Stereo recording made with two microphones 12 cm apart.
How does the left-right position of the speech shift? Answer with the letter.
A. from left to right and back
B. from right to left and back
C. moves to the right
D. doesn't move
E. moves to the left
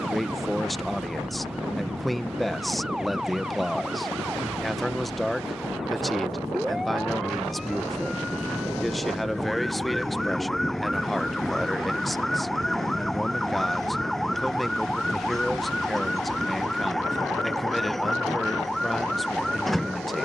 D.